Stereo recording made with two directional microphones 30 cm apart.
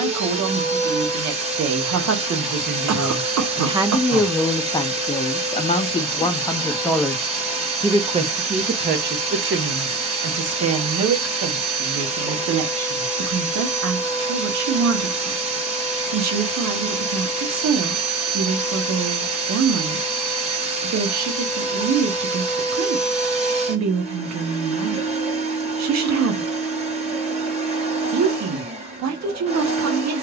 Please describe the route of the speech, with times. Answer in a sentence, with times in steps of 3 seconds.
You can hear the speech on the right from 0 s, in the centre from 3 s and on the right from 9 s.